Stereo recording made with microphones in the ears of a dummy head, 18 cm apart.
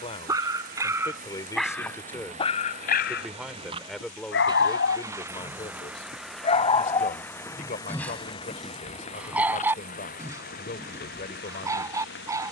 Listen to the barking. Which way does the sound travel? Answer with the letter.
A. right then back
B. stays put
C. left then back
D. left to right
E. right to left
C.